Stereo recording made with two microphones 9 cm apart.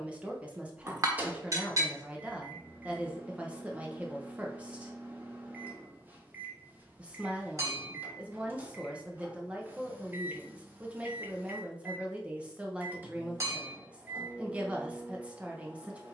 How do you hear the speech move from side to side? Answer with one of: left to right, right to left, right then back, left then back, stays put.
stays put.